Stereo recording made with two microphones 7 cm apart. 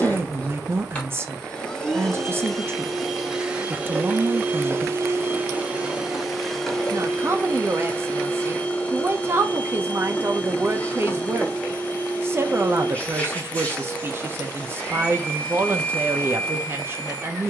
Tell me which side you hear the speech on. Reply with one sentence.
You can hear the speech on the right.